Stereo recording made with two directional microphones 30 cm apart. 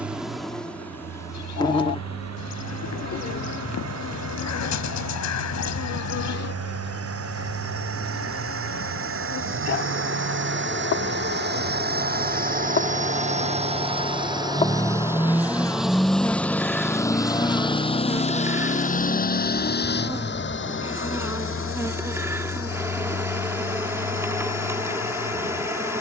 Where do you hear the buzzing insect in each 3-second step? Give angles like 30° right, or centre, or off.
10° left, 40° left, 60° left, 50° left, 30° left, centre, 10° right, 10° right, 10° right.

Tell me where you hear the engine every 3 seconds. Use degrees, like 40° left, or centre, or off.
60° right, 60° right, 50° right, 40° right, 20° right, centre, 30° left, 50° left, 60° left.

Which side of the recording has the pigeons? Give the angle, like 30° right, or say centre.
60° left.